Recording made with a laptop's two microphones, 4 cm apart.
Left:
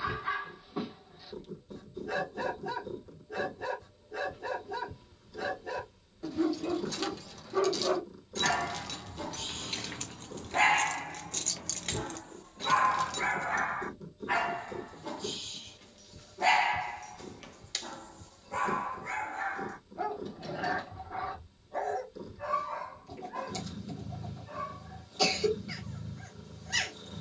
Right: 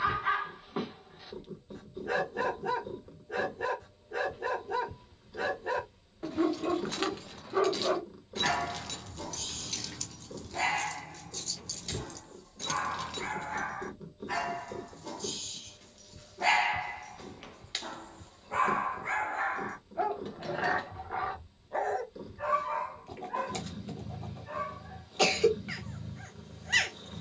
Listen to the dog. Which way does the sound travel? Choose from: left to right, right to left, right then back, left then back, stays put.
left then back.